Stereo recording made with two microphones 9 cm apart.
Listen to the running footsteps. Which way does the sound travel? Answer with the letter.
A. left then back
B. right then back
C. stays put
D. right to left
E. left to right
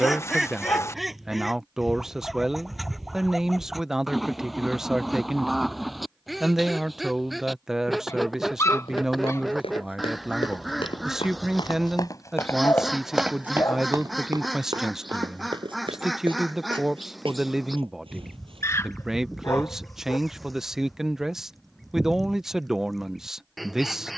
E.